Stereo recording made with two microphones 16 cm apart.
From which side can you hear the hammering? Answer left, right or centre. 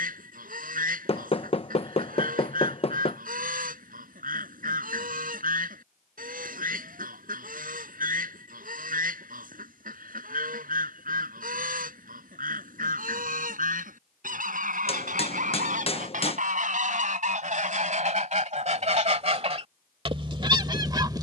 left.